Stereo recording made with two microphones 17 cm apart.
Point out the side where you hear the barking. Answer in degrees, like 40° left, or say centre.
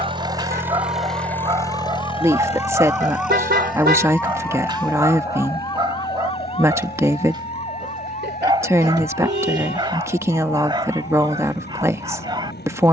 30° right.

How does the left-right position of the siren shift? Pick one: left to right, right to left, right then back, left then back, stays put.
right to left.